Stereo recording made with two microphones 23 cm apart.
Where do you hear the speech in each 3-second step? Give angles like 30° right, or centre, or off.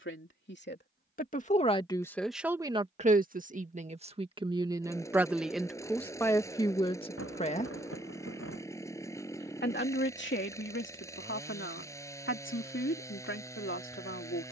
20° left, 20° right, 20° left, 60° left, 60° left.